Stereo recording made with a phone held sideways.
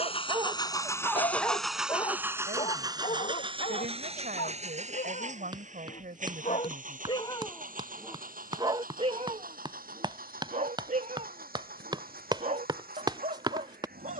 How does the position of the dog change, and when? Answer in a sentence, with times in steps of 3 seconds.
You can hear the dog in the centre from 0 s, on the left from 3 s, in the centre from 6 s and on the right from 9 s.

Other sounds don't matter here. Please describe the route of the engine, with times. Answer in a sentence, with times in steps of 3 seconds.
You can hear the engine in the centre from 0 s and on the right from 3 s.